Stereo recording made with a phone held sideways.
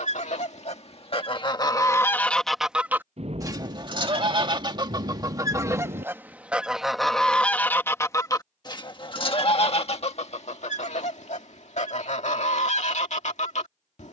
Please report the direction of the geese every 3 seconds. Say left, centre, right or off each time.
left, right, centre, left, left.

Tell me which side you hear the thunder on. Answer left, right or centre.
right.